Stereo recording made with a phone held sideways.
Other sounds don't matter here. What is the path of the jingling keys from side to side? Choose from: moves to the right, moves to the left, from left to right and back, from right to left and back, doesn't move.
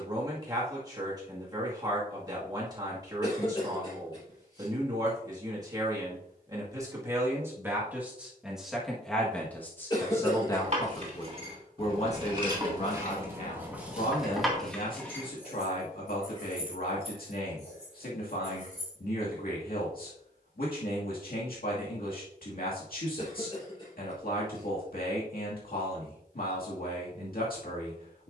moves to the left.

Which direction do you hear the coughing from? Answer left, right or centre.
left.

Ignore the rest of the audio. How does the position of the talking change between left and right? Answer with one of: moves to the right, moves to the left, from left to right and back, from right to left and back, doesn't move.
moves to the left.